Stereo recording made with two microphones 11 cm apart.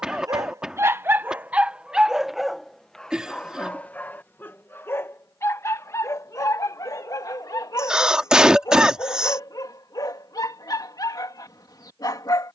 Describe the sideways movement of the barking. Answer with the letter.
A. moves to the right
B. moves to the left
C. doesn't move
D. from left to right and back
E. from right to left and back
B.